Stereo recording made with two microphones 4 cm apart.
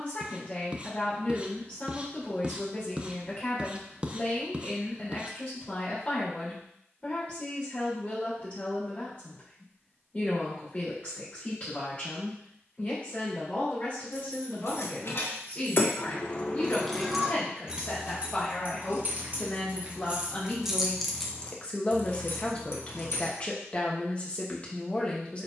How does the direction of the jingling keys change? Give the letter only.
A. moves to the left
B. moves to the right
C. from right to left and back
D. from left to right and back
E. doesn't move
D.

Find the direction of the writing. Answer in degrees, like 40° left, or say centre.
20° right.